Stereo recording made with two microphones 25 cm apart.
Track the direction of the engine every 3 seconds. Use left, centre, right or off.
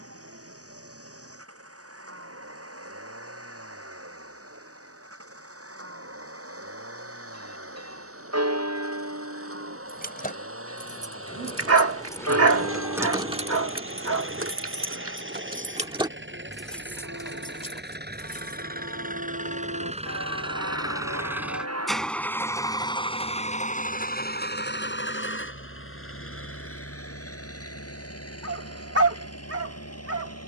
right, right, right, right, right, right, right, centre, left, left.